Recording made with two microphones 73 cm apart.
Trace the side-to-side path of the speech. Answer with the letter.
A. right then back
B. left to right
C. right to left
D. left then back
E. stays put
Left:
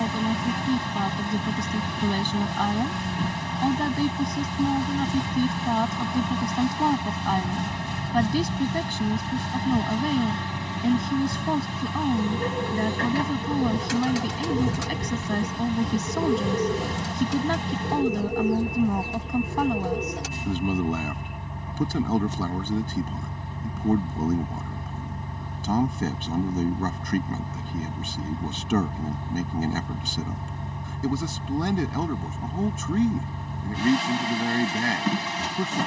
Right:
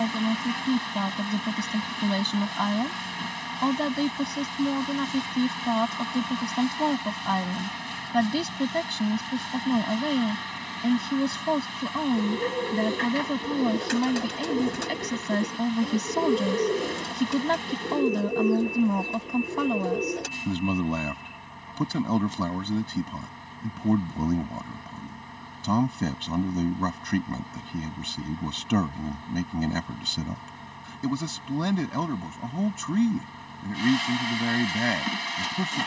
E.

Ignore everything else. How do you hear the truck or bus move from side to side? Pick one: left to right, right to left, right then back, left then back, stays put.
stays put.